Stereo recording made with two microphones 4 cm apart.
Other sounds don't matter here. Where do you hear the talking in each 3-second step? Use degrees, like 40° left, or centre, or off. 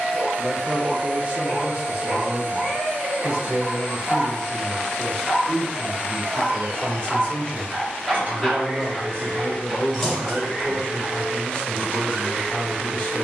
30° right, centre, 20° left, 20° left, 20° left.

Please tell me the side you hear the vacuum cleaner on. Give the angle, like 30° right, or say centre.
40° right.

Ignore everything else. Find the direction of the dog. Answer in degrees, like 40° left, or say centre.
centre.